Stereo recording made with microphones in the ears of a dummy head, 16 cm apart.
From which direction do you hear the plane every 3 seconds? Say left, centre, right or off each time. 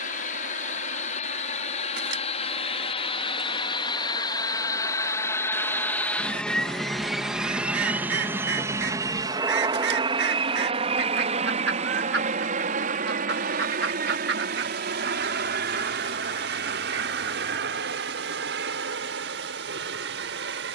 left, left, centre, right, right, right, right.